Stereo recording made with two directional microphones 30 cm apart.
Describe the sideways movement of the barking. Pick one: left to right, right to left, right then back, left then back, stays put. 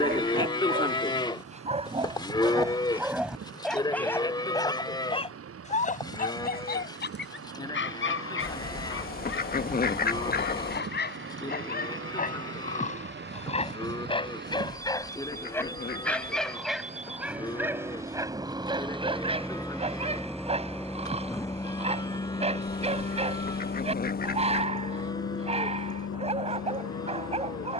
left then back.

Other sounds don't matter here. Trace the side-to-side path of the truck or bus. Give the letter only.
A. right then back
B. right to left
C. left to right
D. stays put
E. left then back
B.